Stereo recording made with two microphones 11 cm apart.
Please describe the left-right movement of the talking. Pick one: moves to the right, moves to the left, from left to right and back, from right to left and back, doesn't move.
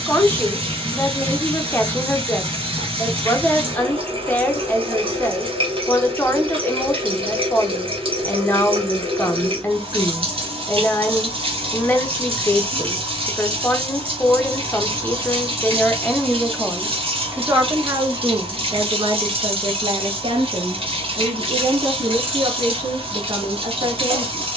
moves to the right.